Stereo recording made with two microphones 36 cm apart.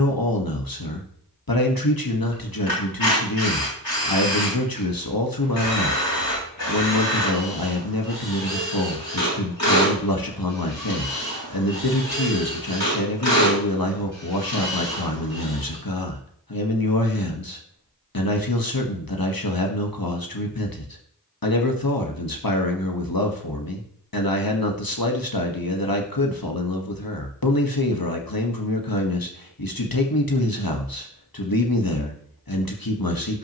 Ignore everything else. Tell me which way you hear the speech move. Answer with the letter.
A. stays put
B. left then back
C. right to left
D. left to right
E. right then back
A.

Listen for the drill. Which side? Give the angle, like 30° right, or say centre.
80° left.